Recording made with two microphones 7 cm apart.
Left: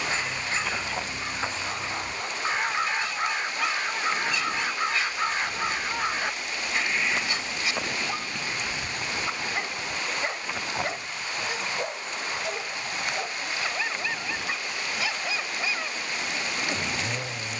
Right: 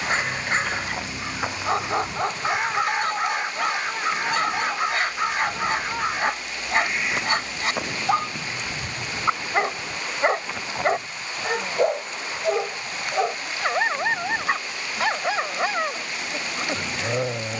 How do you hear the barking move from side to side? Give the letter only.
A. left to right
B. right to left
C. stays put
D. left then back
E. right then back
C.